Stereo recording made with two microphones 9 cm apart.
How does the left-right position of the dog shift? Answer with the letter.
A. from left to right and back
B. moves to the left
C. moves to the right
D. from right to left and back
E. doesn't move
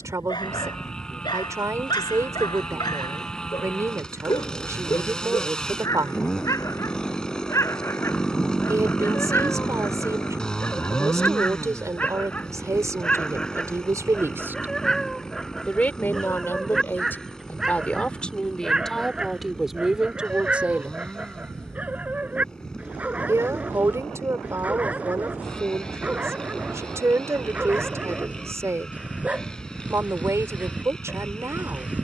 C.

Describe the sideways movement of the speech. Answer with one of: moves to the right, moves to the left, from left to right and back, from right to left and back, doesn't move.
from right to left and back.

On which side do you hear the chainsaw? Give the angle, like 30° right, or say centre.
10° left.